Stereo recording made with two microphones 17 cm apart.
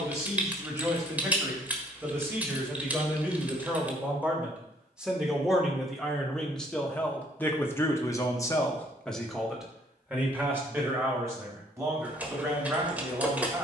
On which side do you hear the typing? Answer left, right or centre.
centre.